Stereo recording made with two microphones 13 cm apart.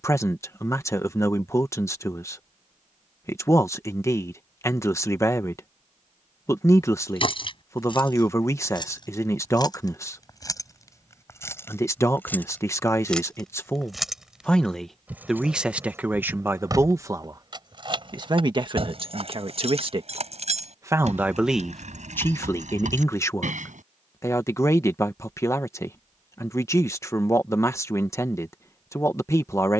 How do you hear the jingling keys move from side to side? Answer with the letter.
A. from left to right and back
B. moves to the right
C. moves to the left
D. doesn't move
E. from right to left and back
B.